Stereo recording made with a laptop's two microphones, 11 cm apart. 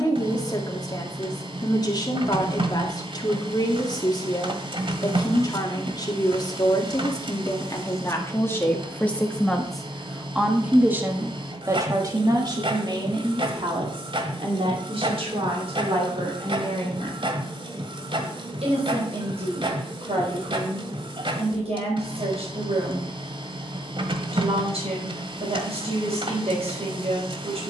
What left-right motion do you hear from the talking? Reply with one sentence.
You can hear the talking move from left to right.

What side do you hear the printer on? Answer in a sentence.
You can hear the printer on the right.